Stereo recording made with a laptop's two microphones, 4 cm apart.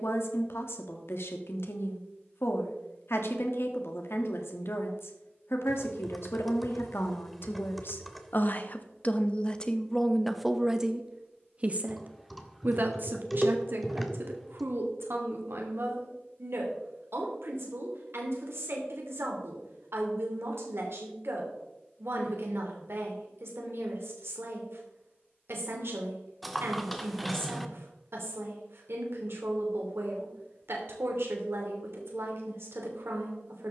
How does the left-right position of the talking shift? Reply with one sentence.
In this clip you hear the talking move to the right.